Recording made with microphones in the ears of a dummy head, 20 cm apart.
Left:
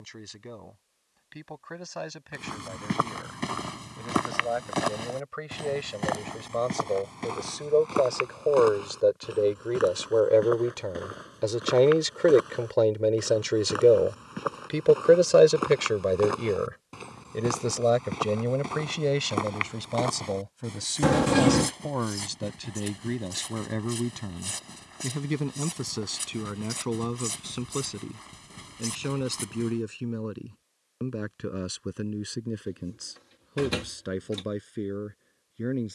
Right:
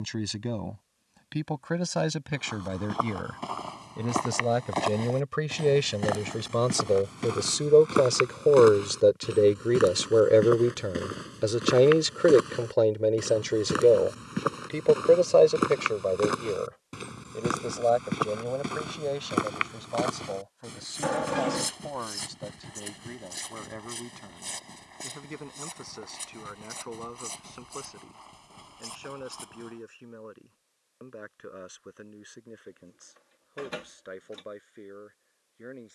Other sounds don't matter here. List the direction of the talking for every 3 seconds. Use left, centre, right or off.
right, right, right, right, centre, left, left, left, left, left, left, left.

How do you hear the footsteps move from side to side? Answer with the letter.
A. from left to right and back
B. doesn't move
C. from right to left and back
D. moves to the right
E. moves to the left
A.